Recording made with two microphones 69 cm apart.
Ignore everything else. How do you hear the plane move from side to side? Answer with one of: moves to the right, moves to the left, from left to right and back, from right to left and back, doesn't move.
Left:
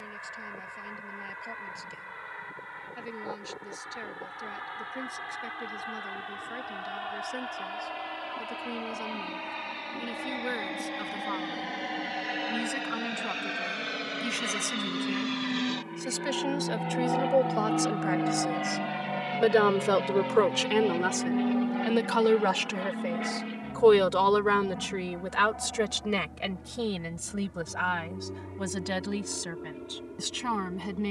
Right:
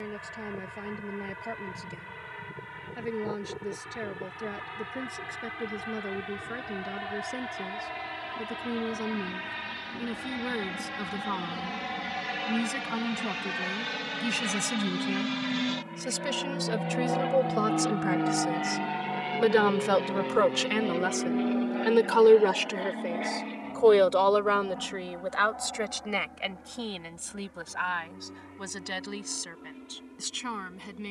moves to the left.